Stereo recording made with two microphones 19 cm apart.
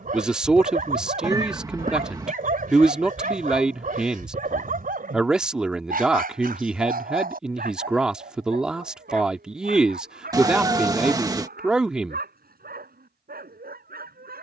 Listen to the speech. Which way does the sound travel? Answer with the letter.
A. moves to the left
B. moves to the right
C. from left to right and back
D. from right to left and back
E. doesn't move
E.